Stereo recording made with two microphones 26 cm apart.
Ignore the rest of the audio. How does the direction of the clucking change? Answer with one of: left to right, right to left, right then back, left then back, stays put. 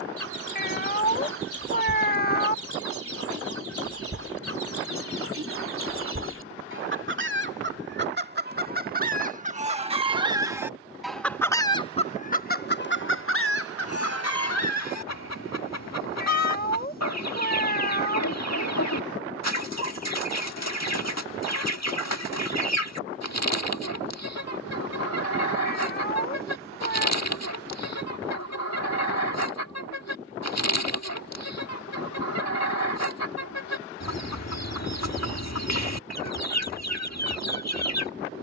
right to left.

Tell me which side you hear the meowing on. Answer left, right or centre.
left.